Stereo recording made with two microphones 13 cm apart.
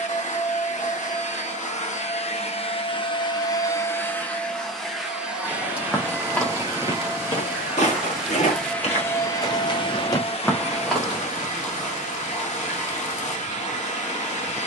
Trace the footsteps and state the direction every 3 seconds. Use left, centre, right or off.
off, centre, left, left, off.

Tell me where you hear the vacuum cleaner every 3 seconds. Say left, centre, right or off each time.
left, centre, centre, left, left.